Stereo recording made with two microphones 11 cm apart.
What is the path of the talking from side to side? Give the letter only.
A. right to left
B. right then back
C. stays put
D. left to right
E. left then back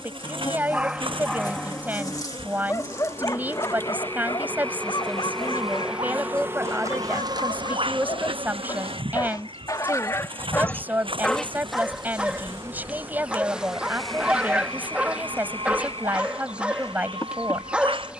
C.